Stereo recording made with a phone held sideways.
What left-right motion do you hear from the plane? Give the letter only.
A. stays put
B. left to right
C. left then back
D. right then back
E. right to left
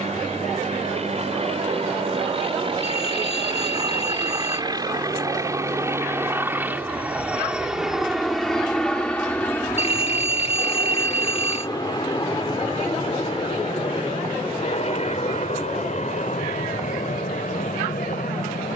E.